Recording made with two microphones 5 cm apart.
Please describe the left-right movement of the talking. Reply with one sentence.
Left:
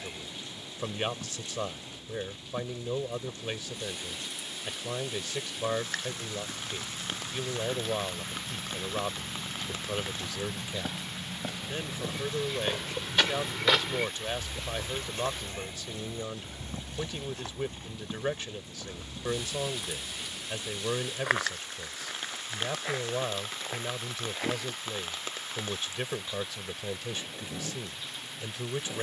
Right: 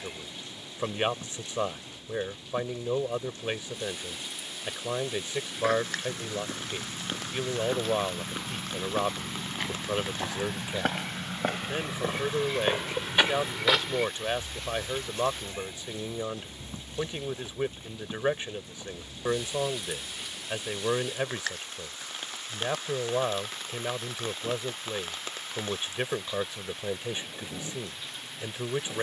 You can hear the talking stay put.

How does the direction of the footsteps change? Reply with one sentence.
You can hear the footsteps travel towards the left.